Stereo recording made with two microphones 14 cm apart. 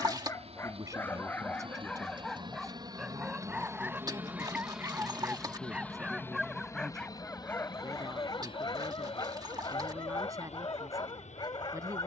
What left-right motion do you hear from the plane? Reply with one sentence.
You can hear the plane move to the left.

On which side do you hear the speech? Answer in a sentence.
In this clip you hear the speech on the right.